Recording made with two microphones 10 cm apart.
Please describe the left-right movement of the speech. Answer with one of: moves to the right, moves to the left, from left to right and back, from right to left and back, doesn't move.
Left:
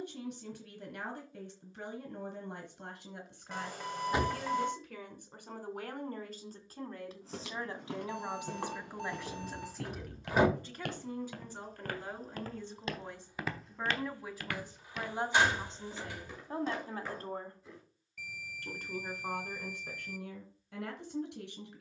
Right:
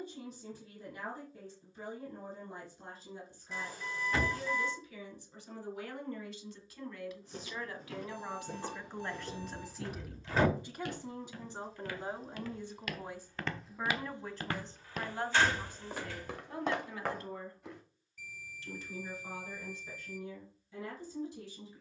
from left to right and back.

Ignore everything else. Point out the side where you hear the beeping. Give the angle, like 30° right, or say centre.
70° left.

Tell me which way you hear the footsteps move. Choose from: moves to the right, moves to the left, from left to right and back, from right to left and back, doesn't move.
moves to the right.